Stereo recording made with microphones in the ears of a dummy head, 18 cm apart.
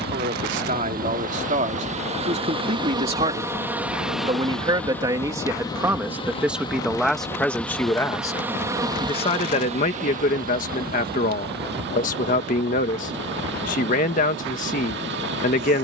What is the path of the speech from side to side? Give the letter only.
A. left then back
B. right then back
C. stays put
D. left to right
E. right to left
E.